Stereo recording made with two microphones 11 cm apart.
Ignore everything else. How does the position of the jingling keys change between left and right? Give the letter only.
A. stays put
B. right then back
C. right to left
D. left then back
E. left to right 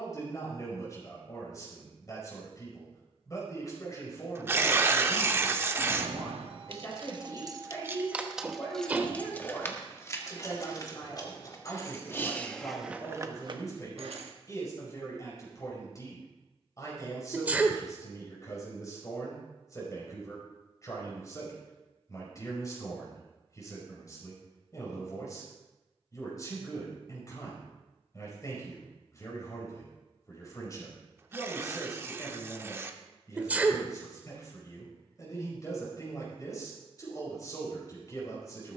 D.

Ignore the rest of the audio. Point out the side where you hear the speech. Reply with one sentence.
In this clip you hear the speech on the left.